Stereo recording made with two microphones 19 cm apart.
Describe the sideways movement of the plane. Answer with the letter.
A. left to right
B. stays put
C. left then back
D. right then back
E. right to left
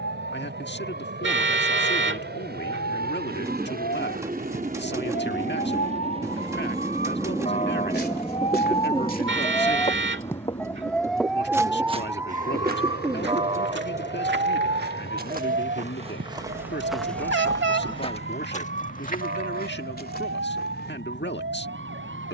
E.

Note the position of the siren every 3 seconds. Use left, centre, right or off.
left, left, left, centre, right, right, right, right.